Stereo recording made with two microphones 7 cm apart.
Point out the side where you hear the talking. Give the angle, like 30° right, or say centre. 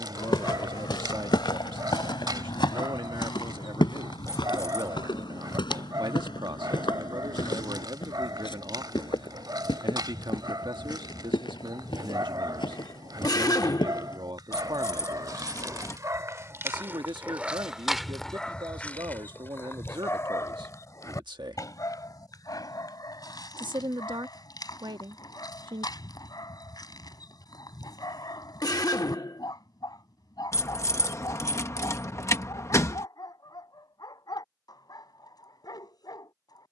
80° right.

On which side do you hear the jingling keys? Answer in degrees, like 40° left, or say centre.
40° left.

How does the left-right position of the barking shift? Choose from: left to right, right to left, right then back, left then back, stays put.
right to left.